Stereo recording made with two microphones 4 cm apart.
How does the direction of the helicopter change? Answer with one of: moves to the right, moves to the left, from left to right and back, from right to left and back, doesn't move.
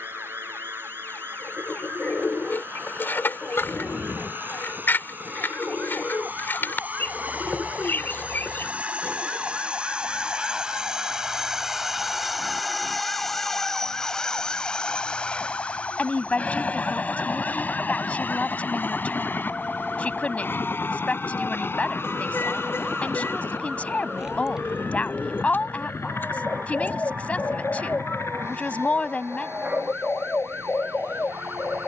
moves to the left.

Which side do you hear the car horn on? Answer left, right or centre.
left.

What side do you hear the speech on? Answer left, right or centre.
left.